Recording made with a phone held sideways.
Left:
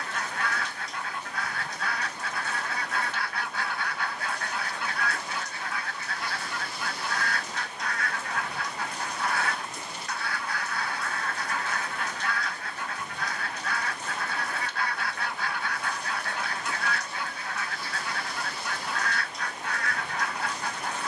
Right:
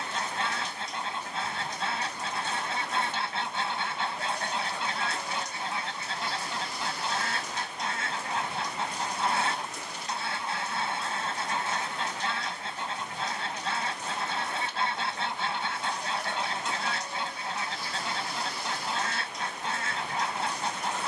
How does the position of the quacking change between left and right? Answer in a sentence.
You can hear the quacking stay in one place.